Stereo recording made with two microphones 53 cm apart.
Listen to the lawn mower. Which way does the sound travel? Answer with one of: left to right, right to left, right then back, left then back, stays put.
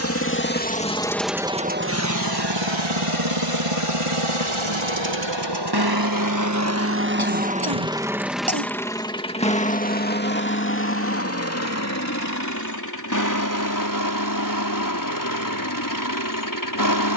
right then back.